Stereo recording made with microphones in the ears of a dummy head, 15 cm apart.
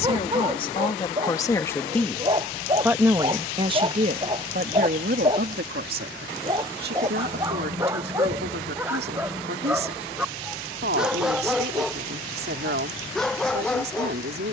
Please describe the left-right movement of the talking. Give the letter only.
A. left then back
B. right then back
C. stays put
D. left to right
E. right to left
D.